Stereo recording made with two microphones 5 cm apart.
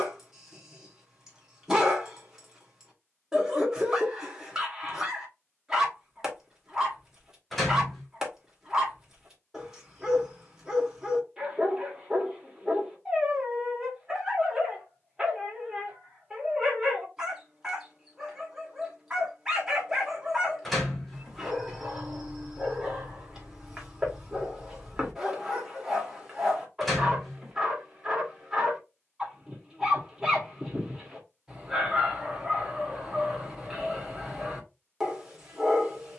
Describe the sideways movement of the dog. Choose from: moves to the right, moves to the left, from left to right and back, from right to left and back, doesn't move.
doesn't move.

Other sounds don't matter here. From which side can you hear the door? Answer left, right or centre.
centre.